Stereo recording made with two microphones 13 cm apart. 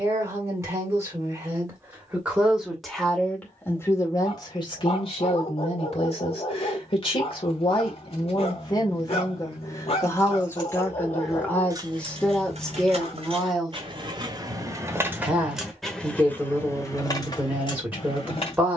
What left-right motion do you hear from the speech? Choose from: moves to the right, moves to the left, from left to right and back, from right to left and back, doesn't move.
from right to left and back.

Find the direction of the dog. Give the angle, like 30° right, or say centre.
50° left.